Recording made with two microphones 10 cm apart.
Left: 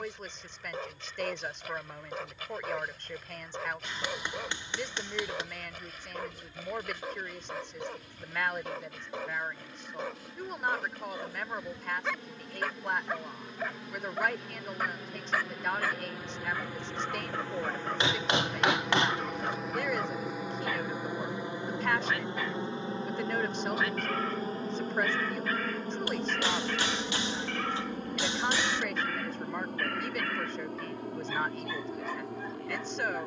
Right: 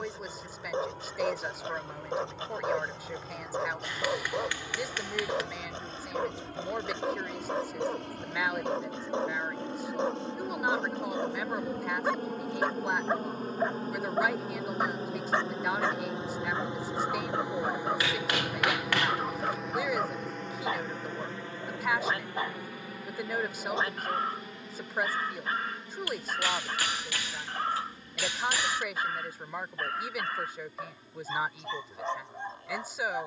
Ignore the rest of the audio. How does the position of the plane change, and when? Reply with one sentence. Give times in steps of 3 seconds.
In this clip you hear the plane on the right from 0 s, in the centre from 18 s and on the left from 21 s.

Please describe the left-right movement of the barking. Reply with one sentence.
You can hear the barking stay put.